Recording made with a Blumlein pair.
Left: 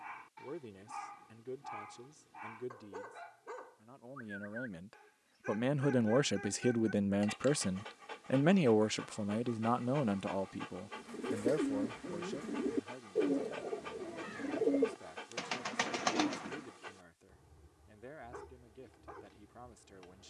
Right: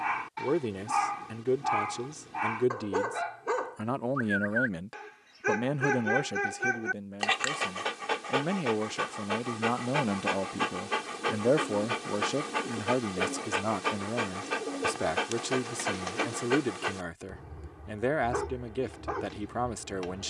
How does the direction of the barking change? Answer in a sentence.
You can hear the barking stay in one place.